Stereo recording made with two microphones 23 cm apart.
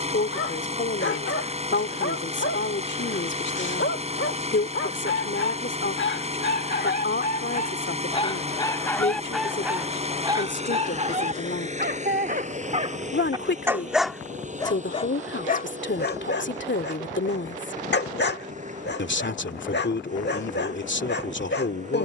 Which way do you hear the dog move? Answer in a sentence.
In this clip you hear the dog move from left to right and back again.